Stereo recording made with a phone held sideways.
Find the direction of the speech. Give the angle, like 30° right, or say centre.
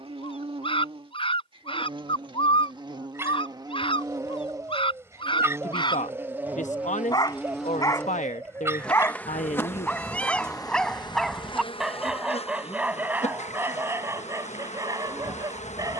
50° left.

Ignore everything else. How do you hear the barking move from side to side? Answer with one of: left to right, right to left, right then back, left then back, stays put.
left to right.